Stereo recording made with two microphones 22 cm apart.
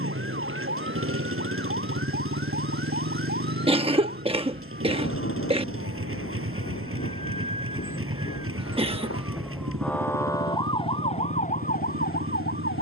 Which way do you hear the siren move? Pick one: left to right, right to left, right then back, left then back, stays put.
right to left.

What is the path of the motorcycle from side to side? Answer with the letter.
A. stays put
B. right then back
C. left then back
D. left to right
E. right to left
A.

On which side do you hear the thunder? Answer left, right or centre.
left.